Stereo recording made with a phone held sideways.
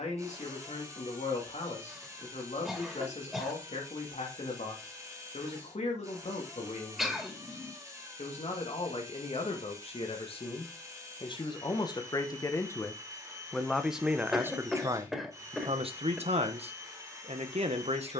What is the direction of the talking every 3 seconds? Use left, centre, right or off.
left, left, left, left, centre, right.